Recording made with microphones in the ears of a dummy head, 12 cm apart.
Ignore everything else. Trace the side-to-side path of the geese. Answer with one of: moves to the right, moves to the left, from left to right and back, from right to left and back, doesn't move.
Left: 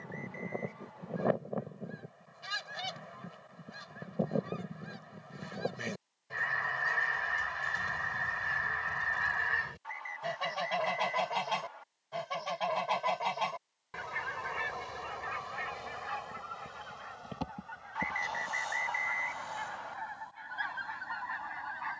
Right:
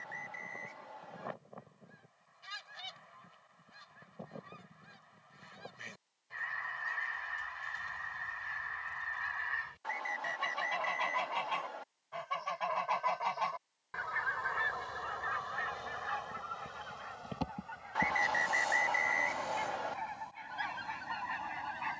moves to the right.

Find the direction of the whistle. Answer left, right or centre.
right.